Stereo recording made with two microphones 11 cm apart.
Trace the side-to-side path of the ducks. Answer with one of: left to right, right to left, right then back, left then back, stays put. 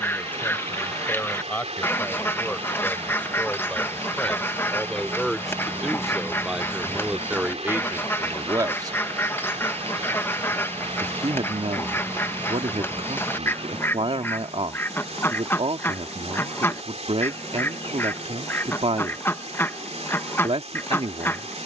stays put.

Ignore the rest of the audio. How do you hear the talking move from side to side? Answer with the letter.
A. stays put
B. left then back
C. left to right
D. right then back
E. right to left
C.